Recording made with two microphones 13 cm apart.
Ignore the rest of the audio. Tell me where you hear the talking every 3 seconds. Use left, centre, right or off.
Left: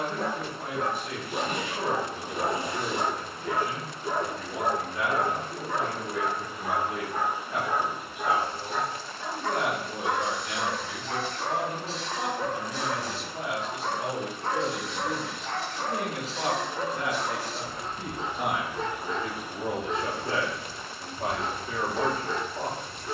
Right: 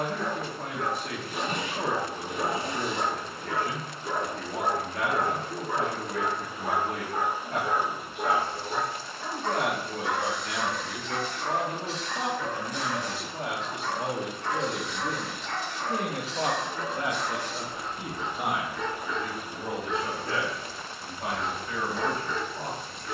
right, right, right, right, right, right, centre, left.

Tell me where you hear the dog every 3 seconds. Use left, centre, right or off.
left, centre, right, left, left, left, left, left.